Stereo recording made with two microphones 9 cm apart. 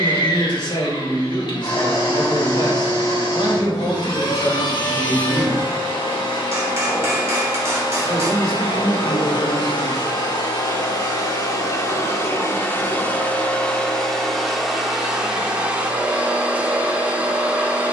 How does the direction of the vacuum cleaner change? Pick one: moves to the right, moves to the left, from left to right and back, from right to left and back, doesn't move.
moves to the right.